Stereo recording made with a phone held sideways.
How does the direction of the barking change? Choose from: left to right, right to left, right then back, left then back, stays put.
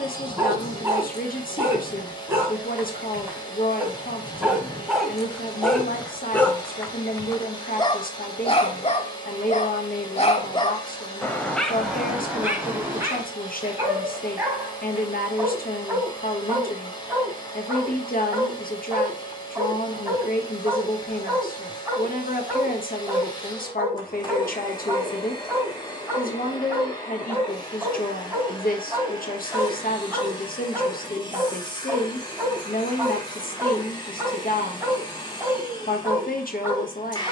left then back.